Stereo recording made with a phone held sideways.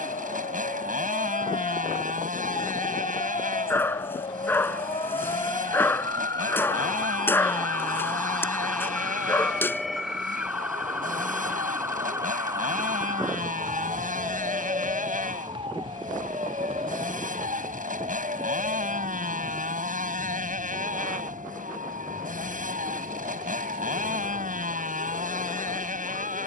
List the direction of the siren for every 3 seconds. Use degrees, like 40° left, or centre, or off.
50° left, 40° left, 20° left, 10° right, 20° right, 40° right, 50° right, 50° right, 60° right.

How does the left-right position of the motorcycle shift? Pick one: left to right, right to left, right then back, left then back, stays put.
stays put.